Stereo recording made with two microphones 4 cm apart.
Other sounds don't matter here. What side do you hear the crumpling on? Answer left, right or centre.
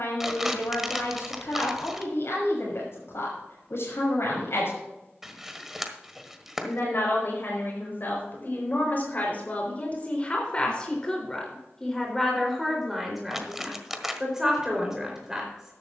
centre.